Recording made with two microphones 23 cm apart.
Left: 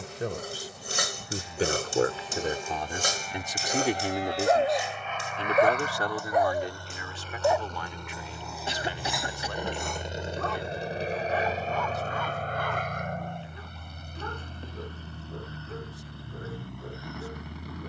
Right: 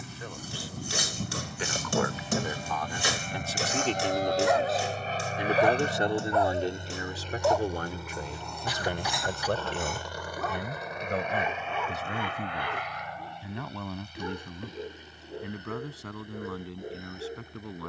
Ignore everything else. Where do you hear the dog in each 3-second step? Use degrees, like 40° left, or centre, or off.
60° left, 40° left, 10° left, centre, 10° right, 20° right.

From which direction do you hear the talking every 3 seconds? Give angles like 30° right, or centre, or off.
40° left, centre, 40° right, 60° right, 70° right, 80° right.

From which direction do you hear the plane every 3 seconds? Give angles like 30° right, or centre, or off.
60° right, 40° right, 10° right, 20° left, 50° left, 60° left.